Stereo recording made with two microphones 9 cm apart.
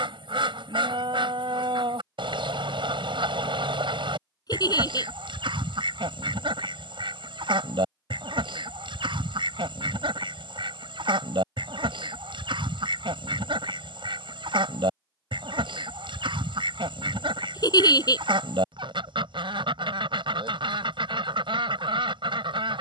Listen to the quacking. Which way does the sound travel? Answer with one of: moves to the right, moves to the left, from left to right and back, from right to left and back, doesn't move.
doesn't move.